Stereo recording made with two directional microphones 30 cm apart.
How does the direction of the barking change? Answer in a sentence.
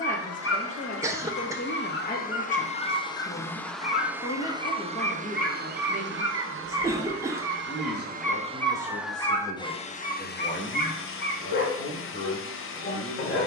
In this clip you hear the barking move from left to right and back again.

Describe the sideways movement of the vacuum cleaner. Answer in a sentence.
In this clip you hear the vacuum cleaner move from left to right and back again.